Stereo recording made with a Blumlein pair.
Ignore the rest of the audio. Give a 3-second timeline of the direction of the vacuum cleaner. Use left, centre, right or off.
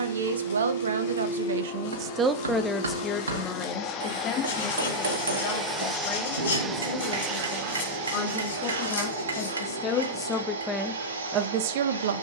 left, left, right, right.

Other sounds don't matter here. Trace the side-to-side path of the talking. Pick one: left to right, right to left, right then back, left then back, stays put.
left then back.